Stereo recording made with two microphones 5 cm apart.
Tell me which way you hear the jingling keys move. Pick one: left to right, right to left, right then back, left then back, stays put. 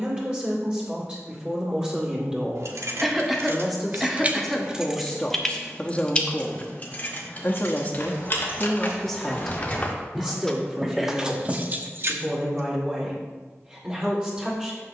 left then back.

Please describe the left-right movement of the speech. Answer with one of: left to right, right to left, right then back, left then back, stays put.
left then back.